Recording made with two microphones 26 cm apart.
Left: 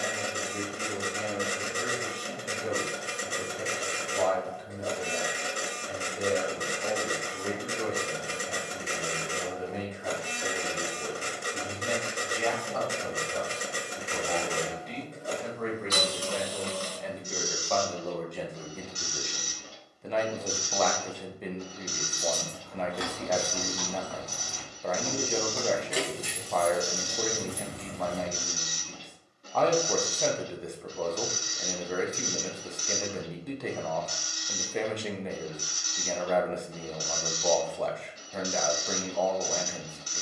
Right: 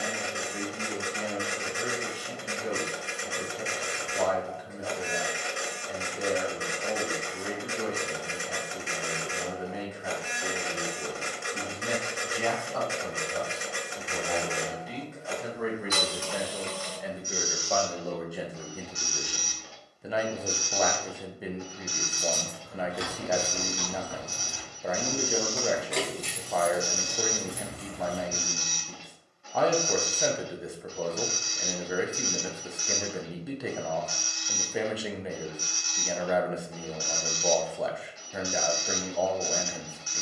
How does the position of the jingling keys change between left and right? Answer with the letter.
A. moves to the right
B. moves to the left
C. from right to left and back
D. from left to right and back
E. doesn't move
B.